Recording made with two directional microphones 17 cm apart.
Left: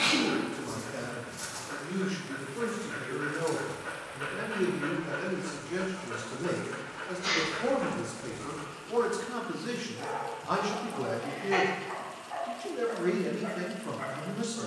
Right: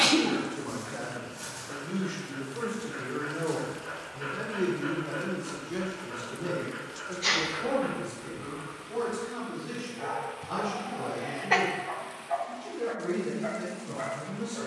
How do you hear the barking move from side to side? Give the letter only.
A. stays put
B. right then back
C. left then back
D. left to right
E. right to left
D.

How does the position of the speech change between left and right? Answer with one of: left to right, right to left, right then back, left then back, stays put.
right to left.